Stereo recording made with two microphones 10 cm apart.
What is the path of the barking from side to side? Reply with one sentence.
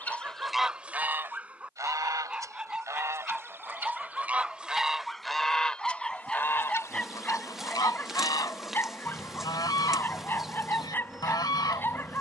You can hear the barking go from the right side to the left.